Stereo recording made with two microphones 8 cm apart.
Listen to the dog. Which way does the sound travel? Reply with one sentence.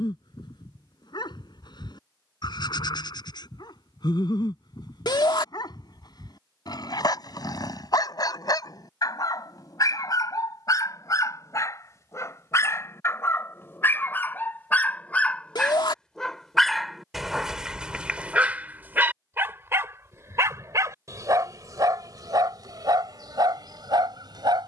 In this clip you hear the dog travel towards the right.